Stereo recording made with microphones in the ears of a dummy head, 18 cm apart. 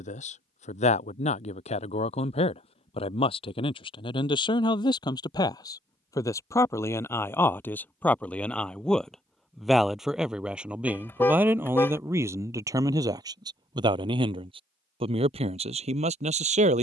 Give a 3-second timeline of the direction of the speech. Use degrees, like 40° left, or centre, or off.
30° left, 20° left, 10° left, 10° right, 20° right, 30° right.